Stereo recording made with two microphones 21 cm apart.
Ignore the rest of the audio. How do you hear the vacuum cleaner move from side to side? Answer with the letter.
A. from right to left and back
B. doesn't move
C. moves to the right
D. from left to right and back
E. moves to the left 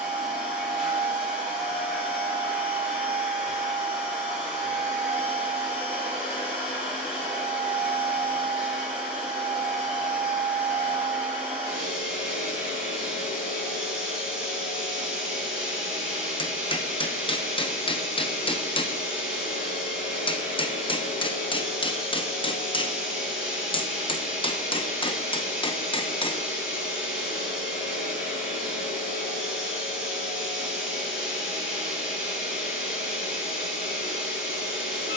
B.